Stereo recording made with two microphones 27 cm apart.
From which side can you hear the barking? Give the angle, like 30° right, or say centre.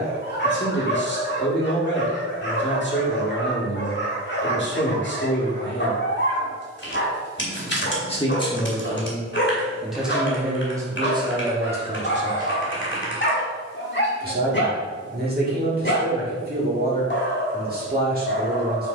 40° left.